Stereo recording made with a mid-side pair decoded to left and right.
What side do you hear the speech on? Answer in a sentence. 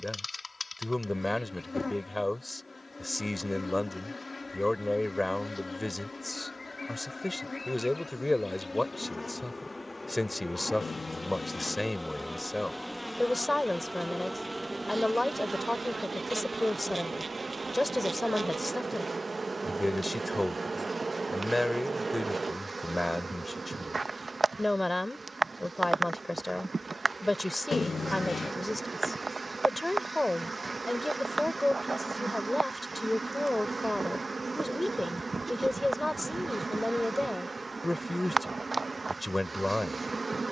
You can hear the speech in the centre.